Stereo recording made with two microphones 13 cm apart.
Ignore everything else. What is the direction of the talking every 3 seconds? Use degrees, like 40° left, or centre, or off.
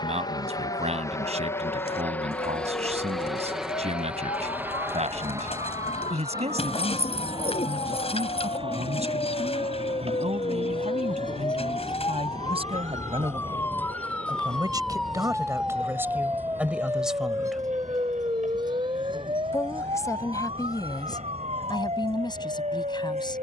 60° right, 60° right, 60° right, 60° right, 40° right, 10° right, 30° left, 30° left.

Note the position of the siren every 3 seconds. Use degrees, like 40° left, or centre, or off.
70° left, 70° left, 60° left, 40° left, 20° left, 10° right, 40° right, 50° right.